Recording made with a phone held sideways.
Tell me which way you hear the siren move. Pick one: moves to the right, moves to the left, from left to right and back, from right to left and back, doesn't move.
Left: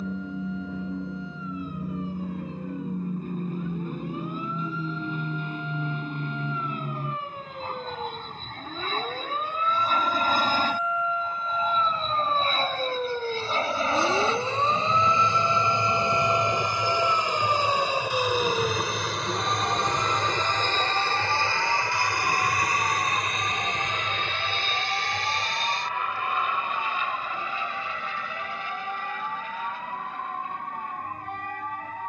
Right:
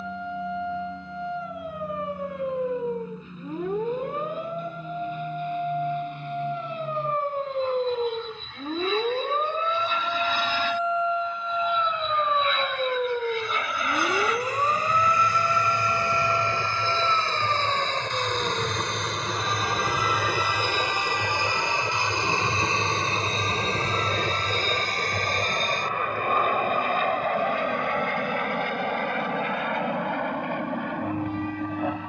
moves to the left.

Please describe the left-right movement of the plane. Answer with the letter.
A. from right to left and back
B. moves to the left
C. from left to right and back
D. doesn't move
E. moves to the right
E.